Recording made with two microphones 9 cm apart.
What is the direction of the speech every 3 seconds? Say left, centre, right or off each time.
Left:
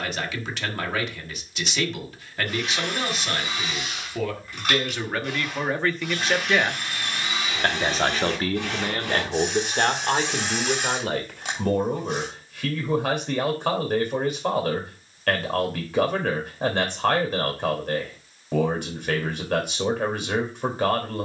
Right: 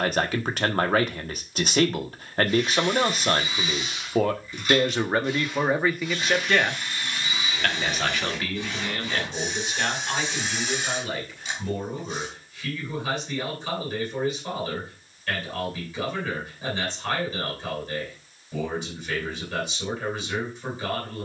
right, right, left, left, left, left, left.